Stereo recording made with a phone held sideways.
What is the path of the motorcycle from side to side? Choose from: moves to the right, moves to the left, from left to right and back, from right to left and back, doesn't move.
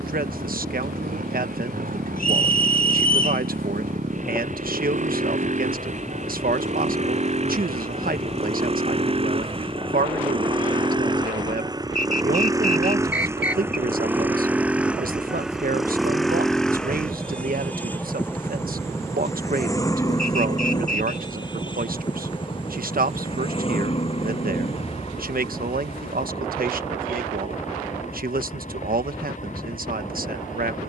moves to the left.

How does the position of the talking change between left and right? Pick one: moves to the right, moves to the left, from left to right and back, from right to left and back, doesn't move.
doesn't move.